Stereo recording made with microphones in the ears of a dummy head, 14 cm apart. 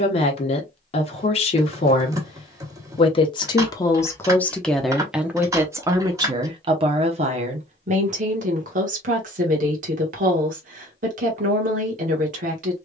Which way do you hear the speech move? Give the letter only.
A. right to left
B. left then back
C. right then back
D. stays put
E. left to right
E.